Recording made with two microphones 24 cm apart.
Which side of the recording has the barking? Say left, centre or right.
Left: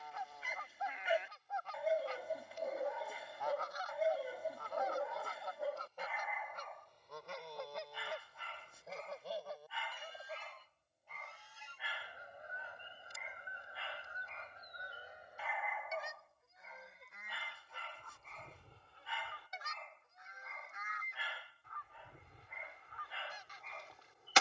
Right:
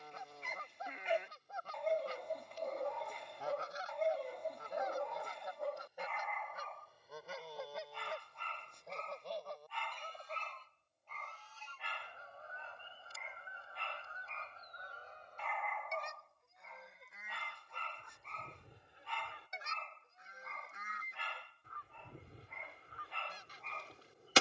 centre.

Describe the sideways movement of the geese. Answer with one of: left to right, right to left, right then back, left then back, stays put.
left then back.